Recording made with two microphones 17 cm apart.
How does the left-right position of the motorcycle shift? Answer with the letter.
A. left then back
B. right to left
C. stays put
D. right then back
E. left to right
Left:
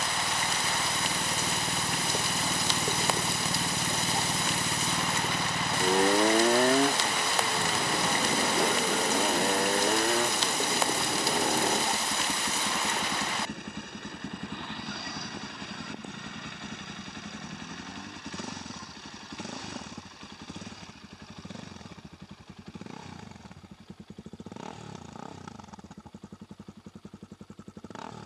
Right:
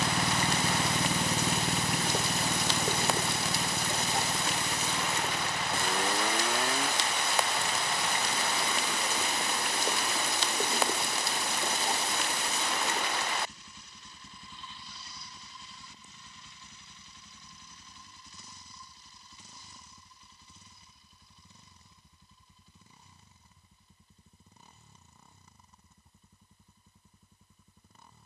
B.